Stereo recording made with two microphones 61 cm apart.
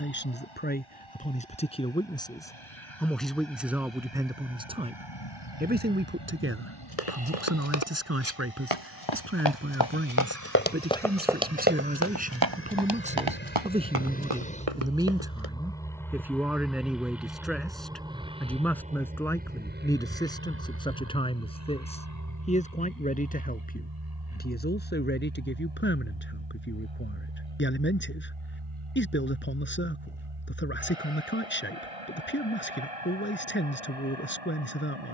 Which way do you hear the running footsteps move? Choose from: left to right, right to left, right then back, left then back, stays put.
left to right.